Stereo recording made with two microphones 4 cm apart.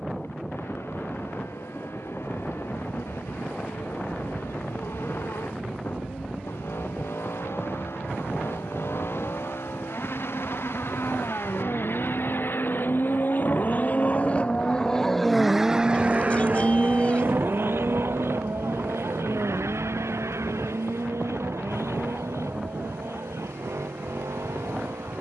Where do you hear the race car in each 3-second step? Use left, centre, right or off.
left, left, left, left, left, right, right, right, right.